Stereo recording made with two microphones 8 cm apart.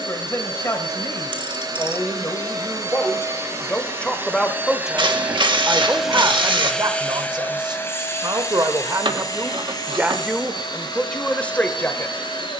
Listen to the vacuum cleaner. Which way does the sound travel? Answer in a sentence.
In this clip you hear the vacuum cleaner go from the right side to the left.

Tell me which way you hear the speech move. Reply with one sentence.
You can hear the speech go right and come back.